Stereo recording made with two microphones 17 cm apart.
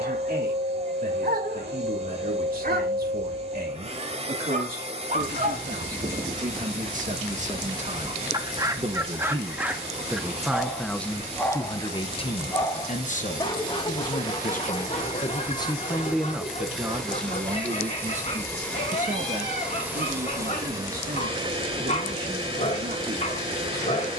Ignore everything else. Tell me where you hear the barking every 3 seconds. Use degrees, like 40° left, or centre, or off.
70° right, 50° right, 30° right, centre, 30° left, 40° left, 40° left, 40° left.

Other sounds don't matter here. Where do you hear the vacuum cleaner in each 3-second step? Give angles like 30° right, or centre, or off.
40° right, 40° right, 40° right, 40° right, 40° right, centre, centre, 30° right.